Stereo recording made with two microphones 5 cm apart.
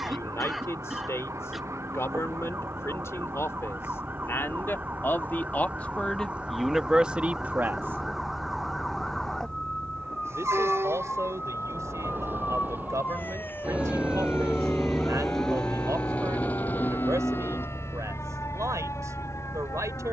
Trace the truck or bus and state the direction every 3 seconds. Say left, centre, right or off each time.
right, right, right, right, right, left, left.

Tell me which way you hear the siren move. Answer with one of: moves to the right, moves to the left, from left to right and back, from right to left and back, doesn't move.
moves to the left.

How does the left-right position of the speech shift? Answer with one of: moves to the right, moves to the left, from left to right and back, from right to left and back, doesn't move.
moves to the right.